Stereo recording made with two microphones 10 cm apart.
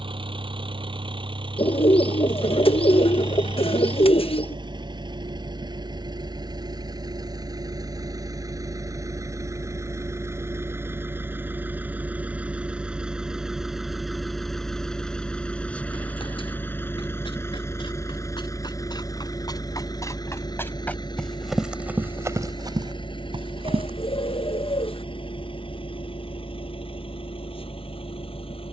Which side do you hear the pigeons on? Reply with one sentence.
You can hear the pigeons on the left.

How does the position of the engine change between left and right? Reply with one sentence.
In this clip you hear the engine travel towards the left.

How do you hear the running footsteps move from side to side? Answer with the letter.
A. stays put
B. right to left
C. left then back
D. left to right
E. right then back
D.